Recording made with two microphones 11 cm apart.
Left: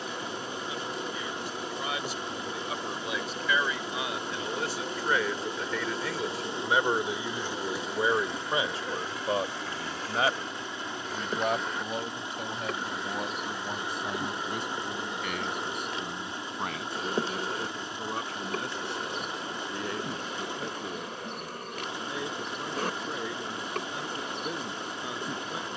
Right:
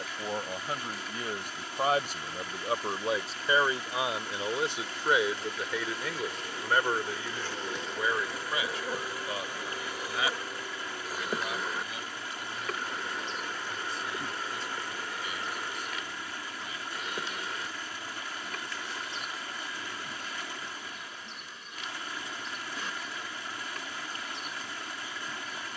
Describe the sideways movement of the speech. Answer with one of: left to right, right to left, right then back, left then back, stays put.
right to left.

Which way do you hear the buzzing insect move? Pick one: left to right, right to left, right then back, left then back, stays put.
right then back.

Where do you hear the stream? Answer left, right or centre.
left.